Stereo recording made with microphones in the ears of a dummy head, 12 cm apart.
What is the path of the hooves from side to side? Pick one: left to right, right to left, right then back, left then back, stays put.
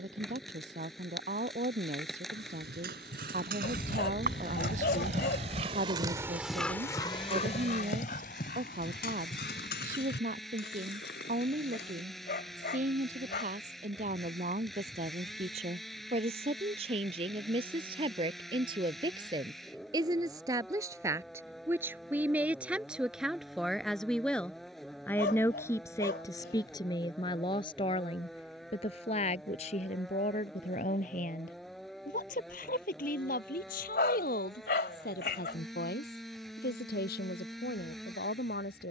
right to left.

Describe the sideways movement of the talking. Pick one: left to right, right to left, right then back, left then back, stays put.
right to left.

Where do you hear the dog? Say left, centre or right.
left.